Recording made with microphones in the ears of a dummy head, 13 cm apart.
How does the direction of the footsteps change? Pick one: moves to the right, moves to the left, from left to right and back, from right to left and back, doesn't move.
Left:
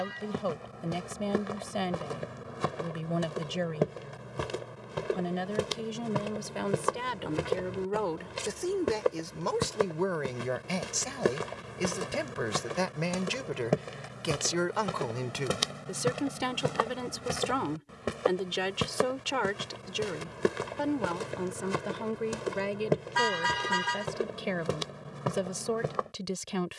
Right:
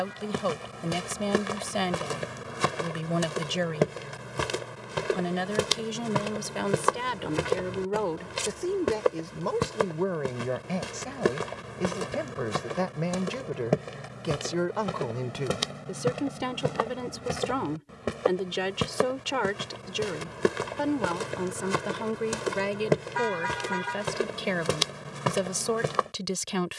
from right to left and back.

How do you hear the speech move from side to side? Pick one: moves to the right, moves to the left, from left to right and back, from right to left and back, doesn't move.
from right to left and back.